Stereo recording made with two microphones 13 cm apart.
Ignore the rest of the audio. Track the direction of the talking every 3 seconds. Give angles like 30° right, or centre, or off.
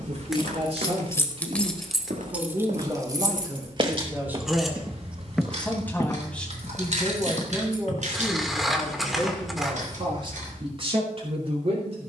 40° right, 10° right, 10° right, 40° right.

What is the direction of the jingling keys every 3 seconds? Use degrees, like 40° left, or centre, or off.
10° left, 40° right, 60° right, 70° right.